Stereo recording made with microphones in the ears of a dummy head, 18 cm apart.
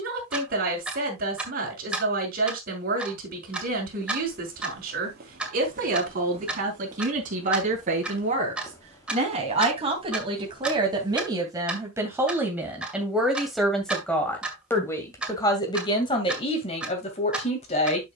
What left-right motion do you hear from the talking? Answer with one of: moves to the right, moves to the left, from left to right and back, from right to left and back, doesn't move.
moves to the left.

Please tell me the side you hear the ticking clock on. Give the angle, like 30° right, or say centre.
10° right.